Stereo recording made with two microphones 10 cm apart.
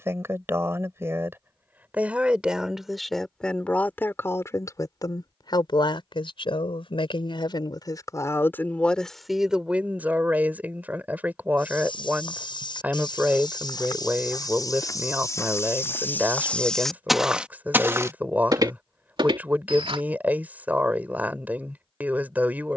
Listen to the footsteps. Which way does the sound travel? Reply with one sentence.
You can hear the footsteps move to the right.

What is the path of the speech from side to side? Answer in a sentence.
You can hear the speech go left and come back.